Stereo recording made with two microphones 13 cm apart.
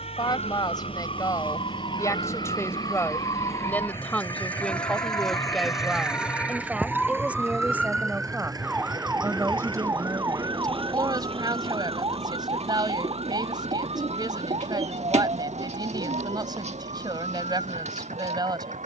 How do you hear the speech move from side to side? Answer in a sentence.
In this clip you hear the speech go from the left side to the right.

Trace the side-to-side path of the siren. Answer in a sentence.
You can hear the siren move to the right.